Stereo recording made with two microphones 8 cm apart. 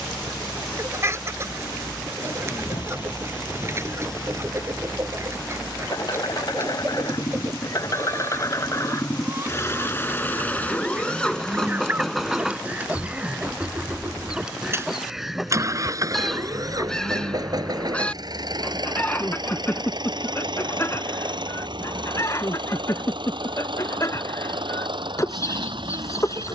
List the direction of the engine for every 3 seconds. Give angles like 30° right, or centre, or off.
70° left, 60° left, 50° left, 20° left, 20° right, 40° right, 60° right, 70° right, 70° right.